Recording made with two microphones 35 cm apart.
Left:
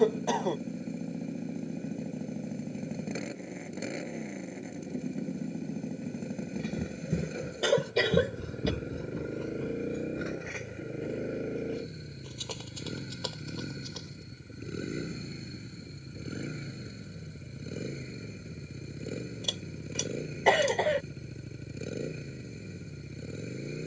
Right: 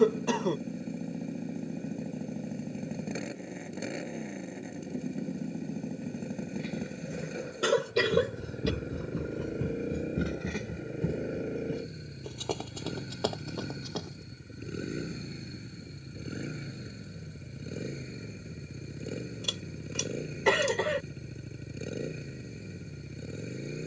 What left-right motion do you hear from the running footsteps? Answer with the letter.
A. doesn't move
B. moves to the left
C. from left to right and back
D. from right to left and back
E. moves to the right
E.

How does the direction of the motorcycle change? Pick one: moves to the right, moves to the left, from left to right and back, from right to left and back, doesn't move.
doesn't move.